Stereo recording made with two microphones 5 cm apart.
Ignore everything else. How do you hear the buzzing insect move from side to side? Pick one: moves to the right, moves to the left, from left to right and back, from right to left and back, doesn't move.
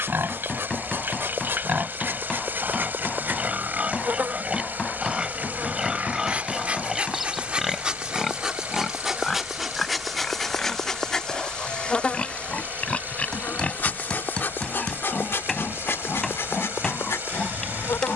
moves to the left.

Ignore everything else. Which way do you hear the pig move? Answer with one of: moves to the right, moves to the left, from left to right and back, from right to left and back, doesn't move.
moves to the left.